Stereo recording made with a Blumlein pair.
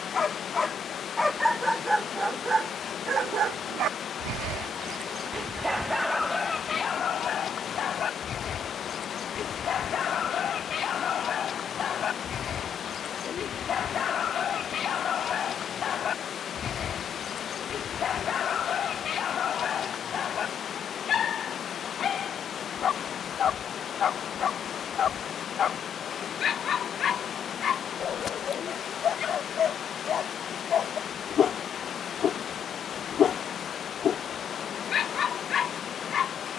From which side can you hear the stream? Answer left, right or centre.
left.